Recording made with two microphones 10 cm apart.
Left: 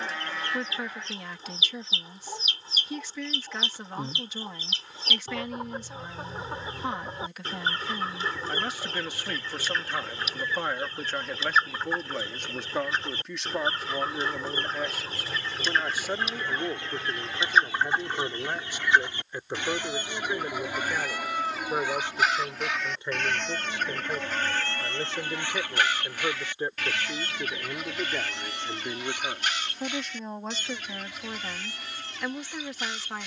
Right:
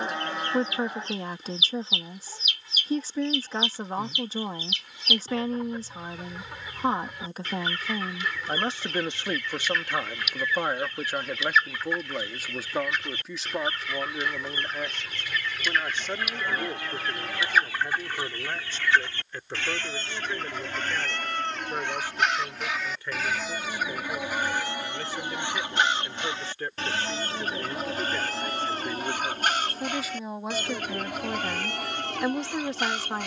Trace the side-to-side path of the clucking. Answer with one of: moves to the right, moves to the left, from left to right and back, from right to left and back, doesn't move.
moves to the right.